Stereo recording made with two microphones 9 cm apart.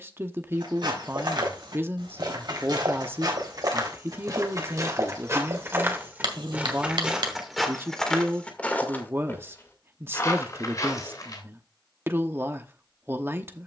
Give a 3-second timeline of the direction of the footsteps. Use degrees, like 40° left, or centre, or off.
60° right, 40° right, centre, 40° left, off.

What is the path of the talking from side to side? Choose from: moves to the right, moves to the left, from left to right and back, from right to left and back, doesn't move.
doesn't move.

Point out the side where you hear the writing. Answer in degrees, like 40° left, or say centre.
70° right.